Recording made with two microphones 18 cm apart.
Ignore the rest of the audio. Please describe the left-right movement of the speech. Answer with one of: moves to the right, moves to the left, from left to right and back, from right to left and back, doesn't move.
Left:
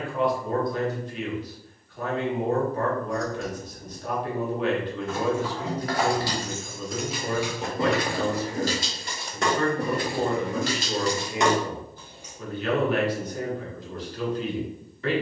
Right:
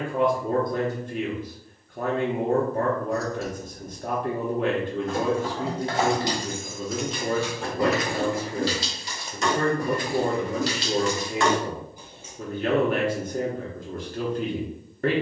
doesn't move.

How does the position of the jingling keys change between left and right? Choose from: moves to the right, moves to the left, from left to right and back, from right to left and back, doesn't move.
from right to left and back.